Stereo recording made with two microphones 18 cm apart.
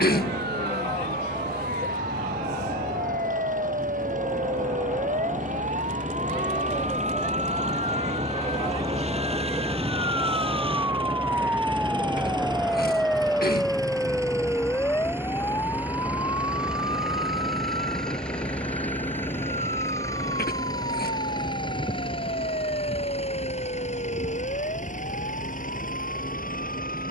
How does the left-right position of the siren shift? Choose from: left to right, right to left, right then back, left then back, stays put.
right to left.